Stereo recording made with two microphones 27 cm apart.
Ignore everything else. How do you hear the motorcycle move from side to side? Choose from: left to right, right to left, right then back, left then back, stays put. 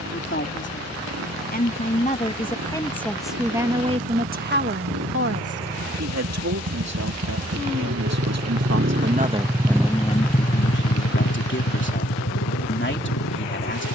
right to left.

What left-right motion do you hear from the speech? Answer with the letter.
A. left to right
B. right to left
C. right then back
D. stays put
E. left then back
C.